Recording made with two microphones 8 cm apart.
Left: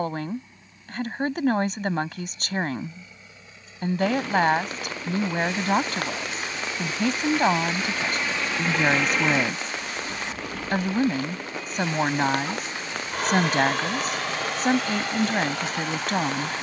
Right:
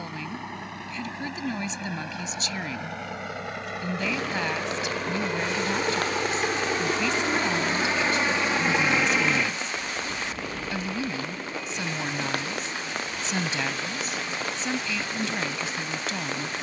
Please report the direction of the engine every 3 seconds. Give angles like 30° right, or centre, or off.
80° right, 70° right, 40° right, 10° left, 60° left, 70° left.